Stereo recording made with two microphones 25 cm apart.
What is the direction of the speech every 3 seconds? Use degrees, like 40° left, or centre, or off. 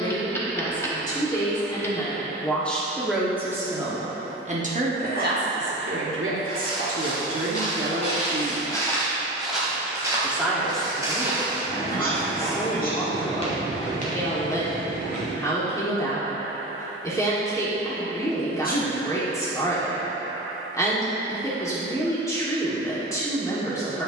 10° left, 30° right, 50° right, 10° left, 10° left, 10° left, 10° left, 10° left.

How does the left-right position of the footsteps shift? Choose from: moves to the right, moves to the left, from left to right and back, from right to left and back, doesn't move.
from left to right and back.